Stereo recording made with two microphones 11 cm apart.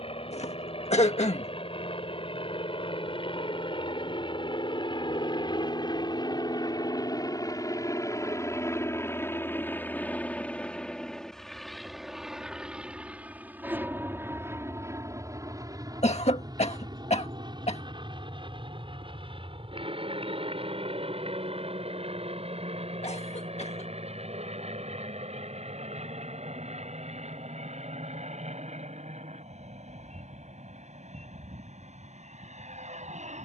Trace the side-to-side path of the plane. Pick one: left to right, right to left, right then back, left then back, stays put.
left to right.